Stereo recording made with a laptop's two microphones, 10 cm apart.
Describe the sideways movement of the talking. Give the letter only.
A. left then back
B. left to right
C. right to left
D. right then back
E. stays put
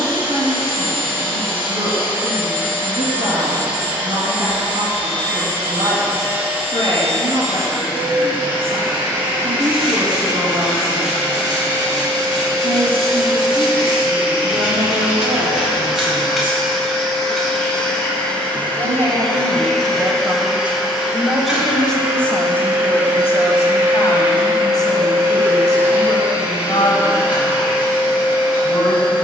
C.